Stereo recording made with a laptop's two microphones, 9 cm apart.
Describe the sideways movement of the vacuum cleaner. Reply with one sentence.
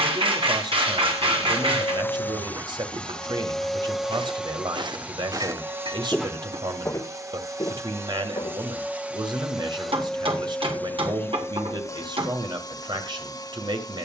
In this clip you hear the vacuum cleaner move from left to right and back again.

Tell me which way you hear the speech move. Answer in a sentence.
In this clip you hear the speech stay in one place.